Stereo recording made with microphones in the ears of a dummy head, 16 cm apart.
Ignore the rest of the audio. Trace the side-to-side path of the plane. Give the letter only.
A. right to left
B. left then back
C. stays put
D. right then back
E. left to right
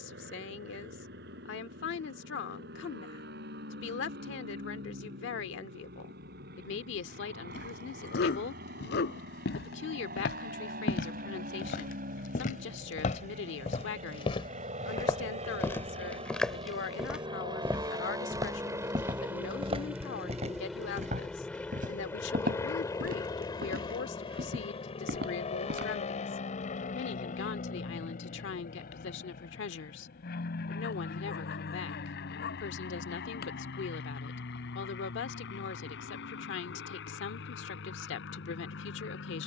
A.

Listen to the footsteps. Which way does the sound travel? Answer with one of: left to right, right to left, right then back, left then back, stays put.
left to right.